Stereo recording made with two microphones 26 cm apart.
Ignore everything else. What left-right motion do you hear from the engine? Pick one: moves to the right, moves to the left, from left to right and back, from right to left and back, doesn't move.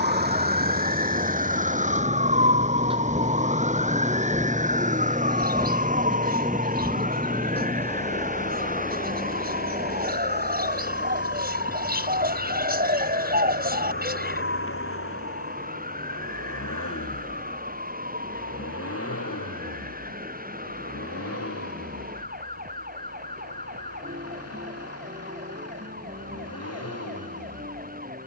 moves to the left.